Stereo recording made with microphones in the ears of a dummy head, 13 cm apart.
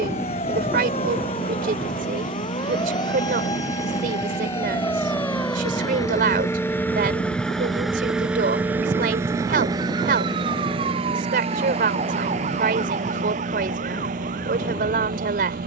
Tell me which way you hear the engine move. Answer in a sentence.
You can hear the engine travel towards the right.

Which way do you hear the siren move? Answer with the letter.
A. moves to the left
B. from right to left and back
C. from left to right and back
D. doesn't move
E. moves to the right
E.